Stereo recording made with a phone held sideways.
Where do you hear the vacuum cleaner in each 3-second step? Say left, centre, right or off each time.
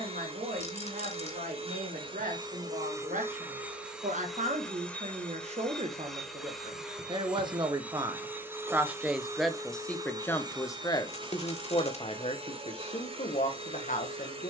right, centre, centre, right, right.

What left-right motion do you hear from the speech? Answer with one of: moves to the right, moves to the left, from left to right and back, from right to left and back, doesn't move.
moves to the left.